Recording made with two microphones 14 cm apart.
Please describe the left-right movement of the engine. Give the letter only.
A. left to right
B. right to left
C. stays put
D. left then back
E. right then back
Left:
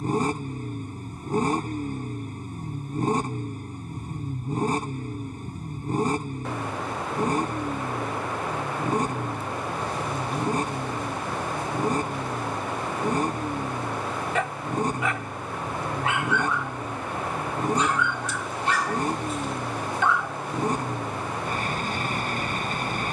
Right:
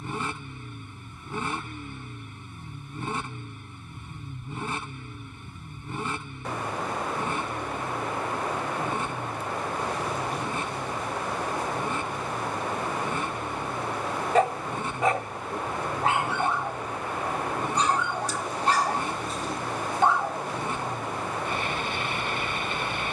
C.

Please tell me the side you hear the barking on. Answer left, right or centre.
right.